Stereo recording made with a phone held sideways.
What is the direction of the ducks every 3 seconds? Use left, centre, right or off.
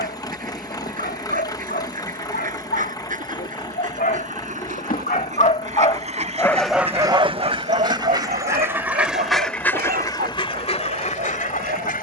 right, right, right, left.